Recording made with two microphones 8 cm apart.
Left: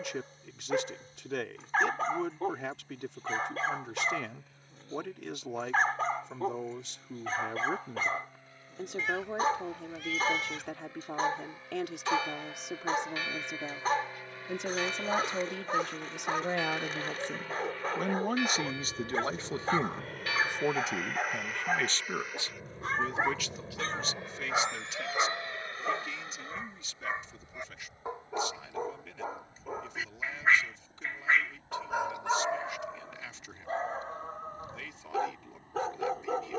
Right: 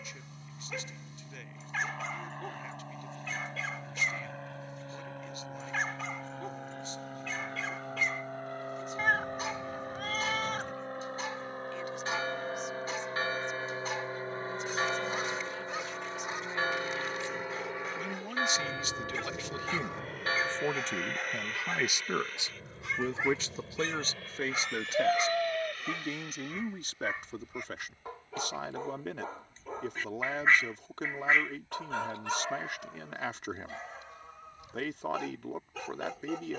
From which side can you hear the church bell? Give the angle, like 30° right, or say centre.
30° right.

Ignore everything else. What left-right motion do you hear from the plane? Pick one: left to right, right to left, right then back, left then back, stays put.
right to left.